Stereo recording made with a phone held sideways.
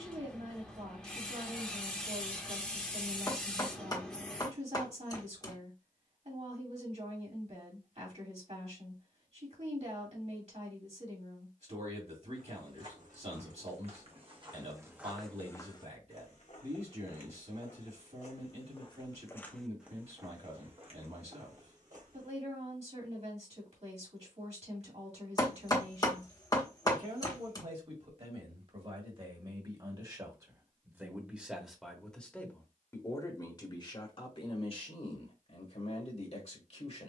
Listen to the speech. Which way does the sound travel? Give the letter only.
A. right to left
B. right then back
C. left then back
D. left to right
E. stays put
A.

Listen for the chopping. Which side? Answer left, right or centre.
left.